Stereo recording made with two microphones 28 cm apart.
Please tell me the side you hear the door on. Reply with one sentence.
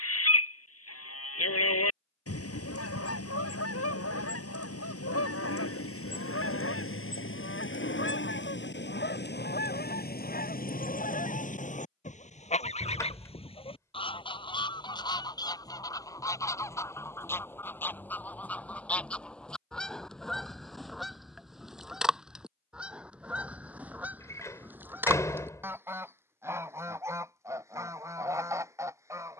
You can hear the door in the centre.